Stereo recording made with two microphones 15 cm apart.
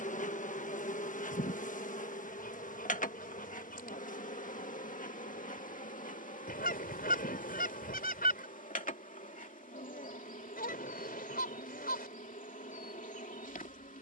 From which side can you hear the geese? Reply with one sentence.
In this clip you hear the geese on the left.